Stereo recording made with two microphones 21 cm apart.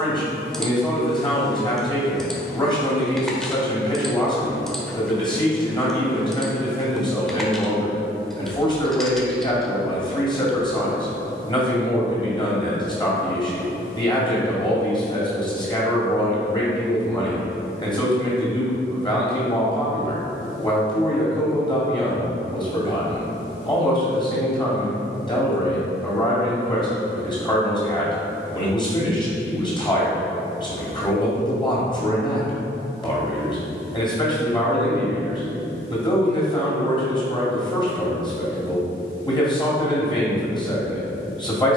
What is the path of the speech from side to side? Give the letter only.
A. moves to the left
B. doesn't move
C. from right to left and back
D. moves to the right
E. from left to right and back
B.